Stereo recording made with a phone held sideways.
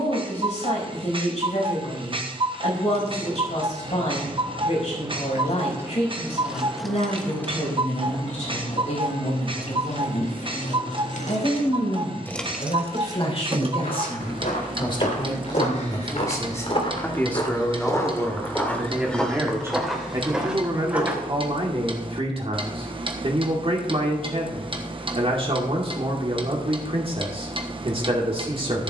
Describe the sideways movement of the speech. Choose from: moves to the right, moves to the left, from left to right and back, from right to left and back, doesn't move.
moves to the right.